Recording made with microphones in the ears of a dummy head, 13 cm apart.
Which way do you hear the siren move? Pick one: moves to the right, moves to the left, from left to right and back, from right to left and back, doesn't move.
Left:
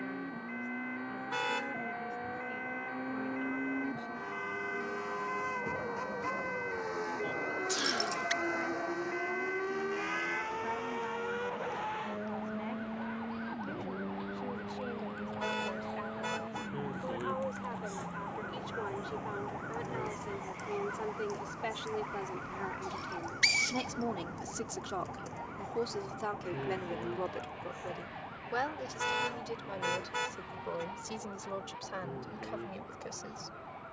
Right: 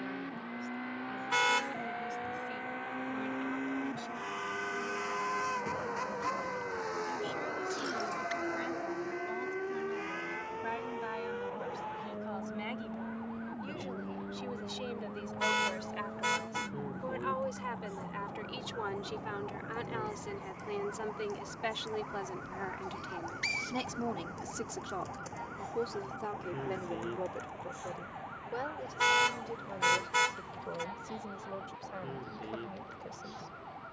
moves to the right.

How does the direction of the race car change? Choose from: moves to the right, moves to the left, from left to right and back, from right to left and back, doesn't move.
moves to the left.